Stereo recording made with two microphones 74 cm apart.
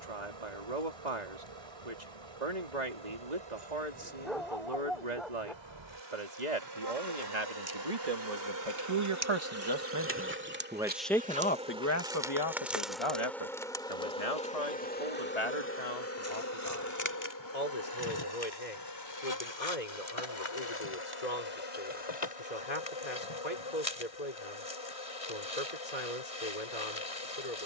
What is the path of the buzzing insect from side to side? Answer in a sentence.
In this clip you hear the buzzing insect travel towards the left.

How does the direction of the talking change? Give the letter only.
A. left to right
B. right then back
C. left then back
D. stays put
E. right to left
E.